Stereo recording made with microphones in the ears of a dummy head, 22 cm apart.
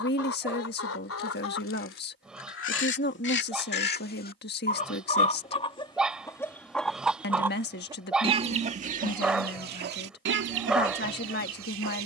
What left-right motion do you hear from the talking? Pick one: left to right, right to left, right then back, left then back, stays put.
stays put.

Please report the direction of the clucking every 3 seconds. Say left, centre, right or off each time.
left, left, centre, right.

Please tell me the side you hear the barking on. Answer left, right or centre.
centre.